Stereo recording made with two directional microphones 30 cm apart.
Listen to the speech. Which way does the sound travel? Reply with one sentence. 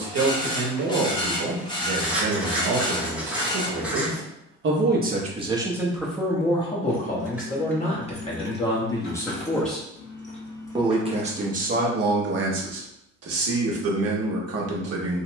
In this clip you hear the speech go left and come back.